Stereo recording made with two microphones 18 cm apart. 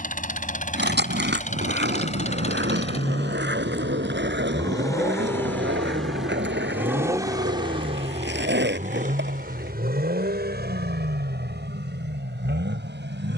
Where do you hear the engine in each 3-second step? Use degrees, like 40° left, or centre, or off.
40° left, 20° left, 20° right, 70° right, 80° right.